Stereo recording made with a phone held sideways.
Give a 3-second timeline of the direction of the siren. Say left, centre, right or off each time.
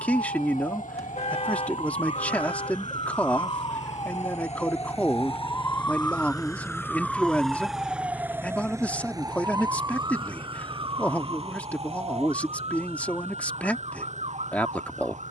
left, left, centre, right, right.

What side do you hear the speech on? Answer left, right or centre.
centre.